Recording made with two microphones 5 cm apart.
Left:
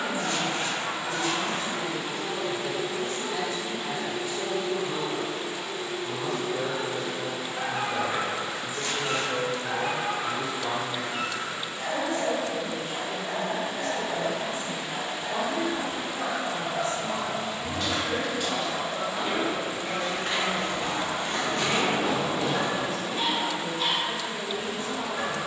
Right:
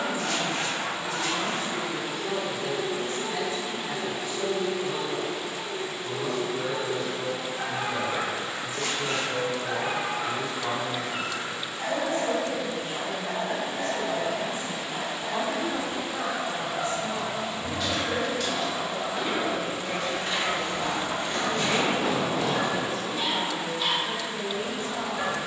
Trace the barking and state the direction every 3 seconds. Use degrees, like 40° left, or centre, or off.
50° left, 50° left, 50° left, 10° right, 30° right, 20° left, 40° left, 40° left, 40° left.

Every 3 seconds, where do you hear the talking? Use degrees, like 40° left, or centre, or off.
30° right, 10° left, 50° left, 10° left, 20° right, 20° right, 20° right, 20° right, 20° right.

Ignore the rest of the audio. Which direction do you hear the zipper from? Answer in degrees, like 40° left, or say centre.
80° right.